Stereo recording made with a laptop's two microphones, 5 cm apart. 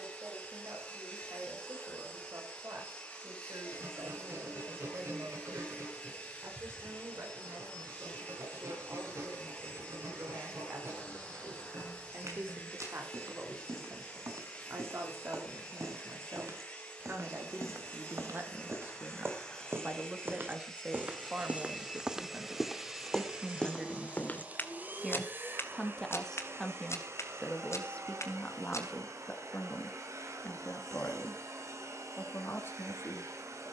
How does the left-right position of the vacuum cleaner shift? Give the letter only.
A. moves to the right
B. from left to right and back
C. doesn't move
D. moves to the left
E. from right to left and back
A.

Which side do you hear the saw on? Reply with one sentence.
You can hear the saw on the right.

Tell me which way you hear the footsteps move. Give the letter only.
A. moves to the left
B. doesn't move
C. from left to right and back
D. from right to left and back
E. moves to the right
A.